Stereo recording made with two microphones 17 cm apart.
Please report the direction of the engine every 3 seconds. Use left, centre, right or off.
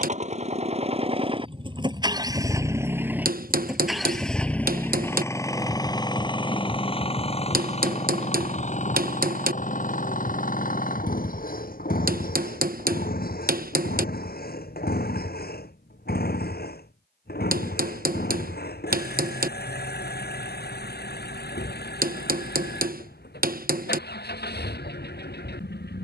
right, centre, left, left, left, left, left, left, left.